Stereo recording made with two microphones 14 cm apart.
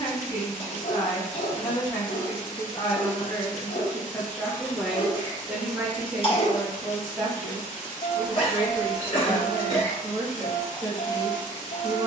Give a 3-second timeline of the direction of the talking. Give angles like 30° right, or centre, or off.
50° left, 10° left, 20° right, 30° right.